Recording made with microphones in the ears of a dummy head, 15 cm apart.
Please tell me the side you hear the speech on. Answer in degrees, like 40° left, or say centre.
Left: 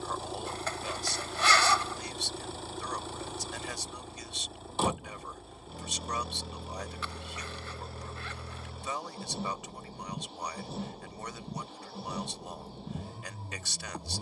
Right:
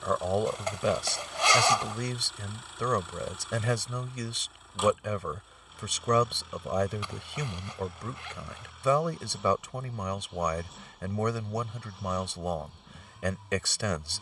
60° right.